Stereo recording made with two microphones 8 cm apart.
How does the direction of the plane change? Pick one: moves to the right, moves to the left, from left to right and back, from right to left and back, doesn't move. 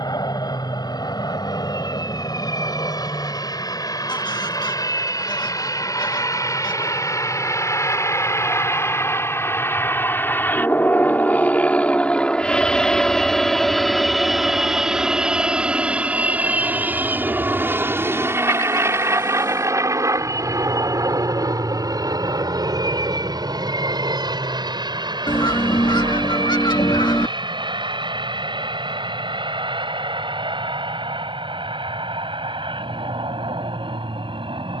moves to the right.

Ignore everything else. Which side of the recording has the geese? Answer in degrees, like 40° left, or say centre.
60° left.